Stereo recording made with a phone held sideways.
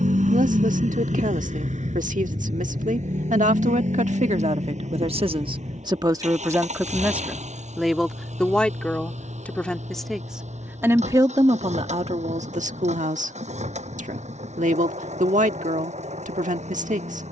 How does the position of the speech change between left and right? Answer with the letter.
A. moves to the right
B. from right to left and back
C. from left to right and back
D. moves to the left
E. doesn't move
B.